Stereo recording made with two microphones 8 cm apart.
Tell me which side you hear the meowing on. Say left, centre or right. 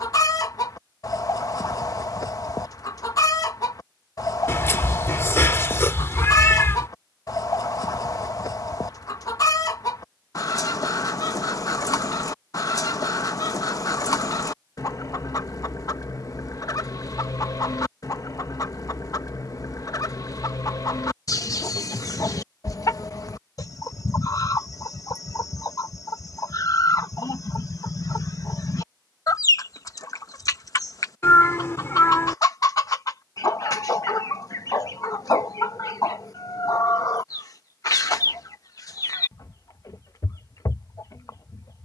left.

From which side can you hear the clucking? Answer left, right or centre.
left.